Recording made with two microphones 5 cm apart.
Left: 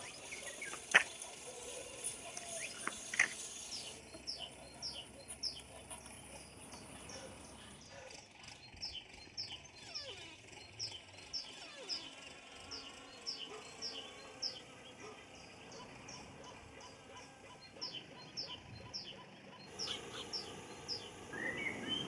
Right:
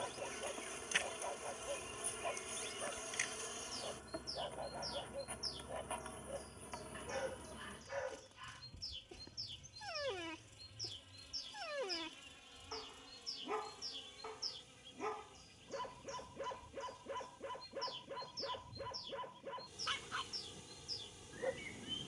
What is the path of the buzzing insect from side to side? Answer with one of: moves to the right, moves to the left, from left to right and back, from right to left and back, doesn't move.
moves to the left.